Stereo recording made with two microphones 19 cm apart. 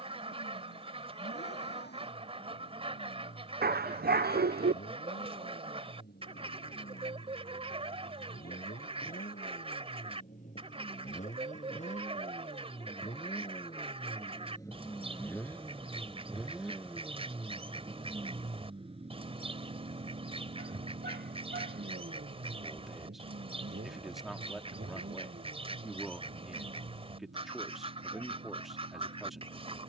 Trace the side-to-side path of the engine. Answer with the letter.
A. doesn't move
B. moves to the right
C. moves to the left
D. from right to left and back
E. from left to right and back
B.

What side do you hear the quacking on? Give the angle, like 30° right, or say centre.
30° right.